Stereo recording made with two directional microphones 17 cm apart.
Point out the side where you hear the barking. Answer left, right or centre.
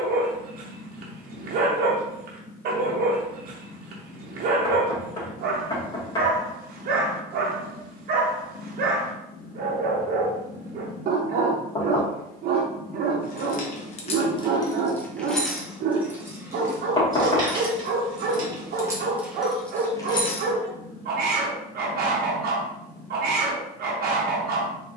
right.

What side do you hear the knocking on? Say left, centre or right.
left.